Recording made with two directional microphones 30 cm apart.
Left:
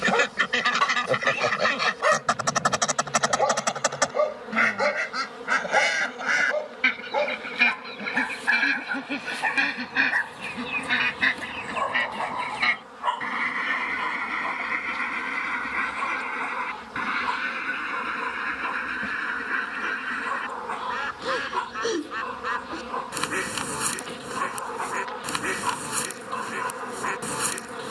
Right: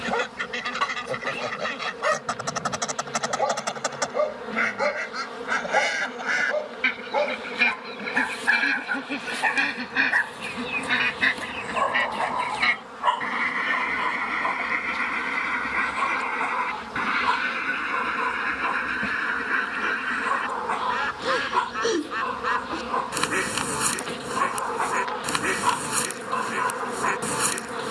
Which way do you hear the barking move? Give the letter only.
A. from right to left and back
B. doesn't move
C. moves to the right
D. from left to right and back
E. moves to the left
C.